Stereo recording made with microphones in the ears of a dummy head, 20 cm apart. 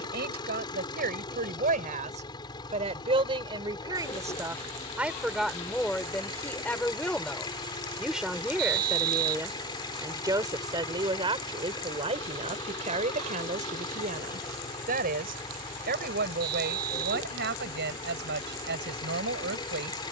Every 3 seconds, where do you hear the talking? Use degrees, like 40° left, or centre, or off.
40° right, 10° right, centre, 20° right, 30° right, 50° right, 50° right.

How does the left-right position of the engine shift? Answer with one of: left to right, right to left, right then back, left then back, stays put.
stays put.